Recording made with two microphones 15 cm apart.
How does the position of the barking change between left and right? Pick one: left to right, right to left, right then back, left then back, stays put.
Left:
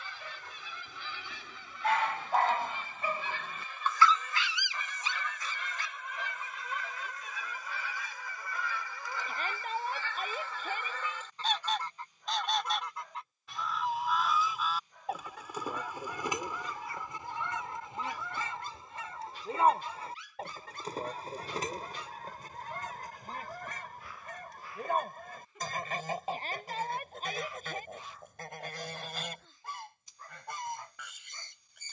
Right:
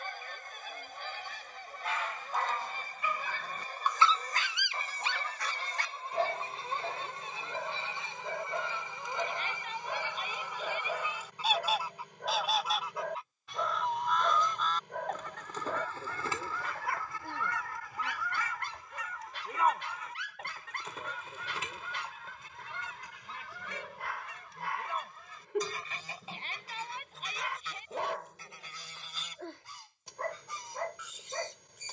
left to right.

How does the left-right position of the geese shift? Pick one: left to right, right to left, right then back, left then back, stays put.
right to left.